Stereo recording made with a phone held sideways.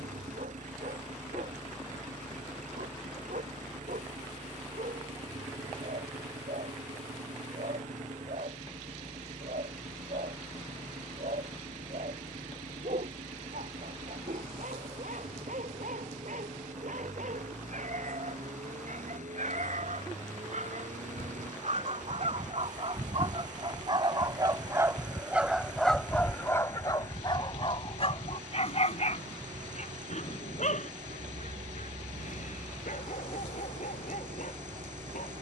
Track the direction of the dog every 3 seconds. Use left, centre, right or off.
right, right, right, right, right, right, right, right, centre, left, left, left.